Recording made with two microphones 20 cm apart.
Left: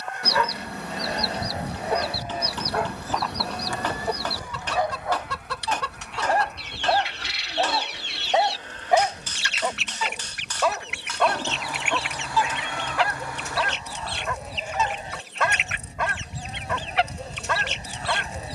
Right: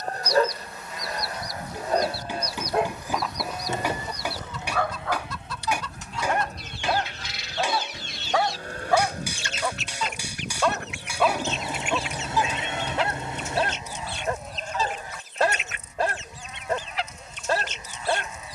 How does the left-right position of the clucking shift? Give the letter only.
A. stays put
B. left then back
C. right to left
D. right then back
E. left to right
A.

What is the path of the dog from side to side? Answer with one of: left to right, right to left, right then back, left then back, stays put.
left then back.